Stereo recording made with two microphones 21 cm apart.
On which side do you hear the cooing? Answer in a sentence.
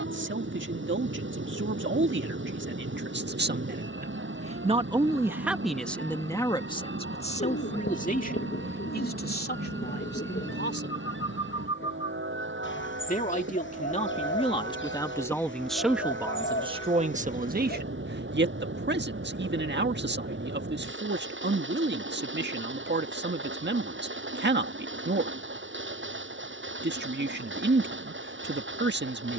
In this clip you hear the cooing on the left.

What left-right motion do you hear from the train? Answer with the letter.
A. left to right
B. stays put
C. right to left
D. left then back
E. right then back
B.